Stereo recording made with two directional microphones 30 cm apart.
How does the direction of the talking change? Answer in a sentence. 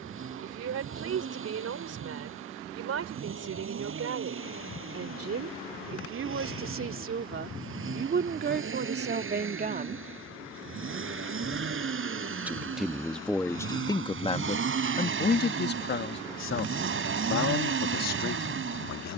You can hear the talking move from right to left.